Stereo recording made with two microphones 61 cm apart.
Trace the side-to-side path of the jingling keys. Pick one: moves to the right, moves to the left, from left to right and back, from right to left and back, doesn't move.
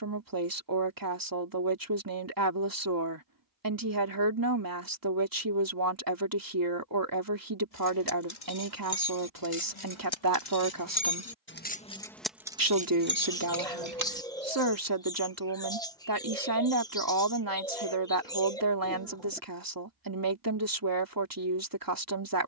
moves to the right.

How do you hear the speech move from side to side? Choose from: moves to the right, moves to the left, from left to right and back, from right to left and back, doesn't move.
doesn't move.